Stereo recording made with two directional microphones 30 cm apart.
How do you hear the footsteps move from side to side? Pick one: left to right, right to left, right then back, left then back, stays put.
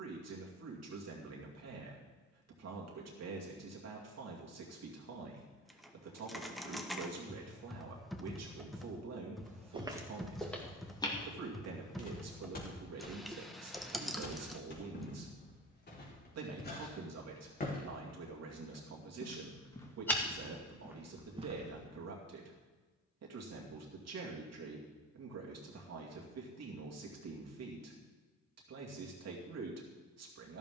left then back.